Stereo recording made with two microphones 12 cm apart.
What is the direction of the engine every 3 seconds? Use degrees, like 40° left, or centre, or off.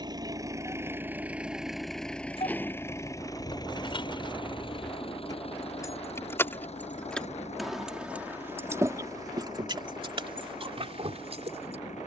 10° right, 40° left, 60° left, 70° left.